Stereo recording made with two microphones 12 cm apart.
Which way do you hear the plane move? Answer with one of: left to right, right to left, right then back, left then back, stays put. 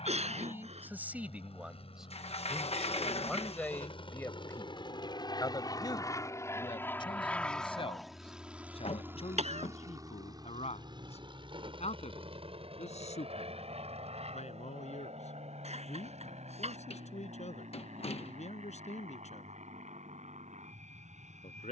left to right.